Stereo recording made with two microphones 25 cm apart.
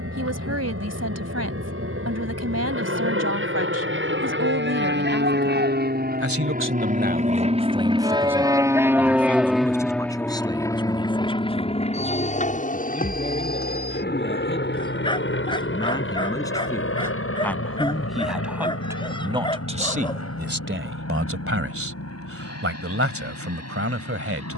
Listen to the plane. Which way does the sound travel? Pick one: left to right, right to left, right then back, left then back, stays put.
right to left.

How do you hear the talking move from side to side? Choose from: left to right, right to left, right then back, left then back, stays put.
left then back.